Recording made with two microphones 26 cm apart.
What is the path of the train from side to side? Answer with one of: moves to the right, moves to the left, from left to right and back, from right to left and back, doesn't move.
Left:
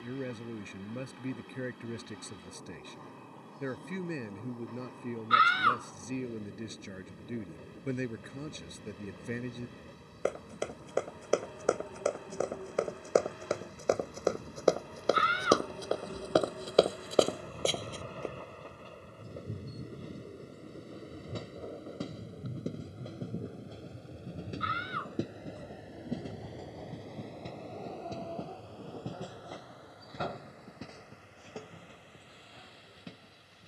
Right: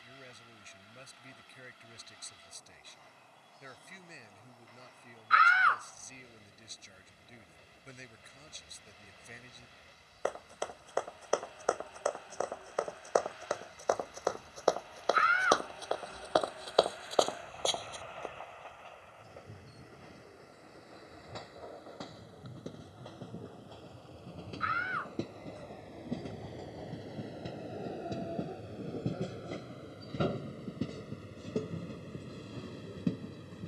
moves to the right.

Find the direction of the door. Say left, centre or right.
left.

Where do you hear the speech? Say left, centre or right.
left.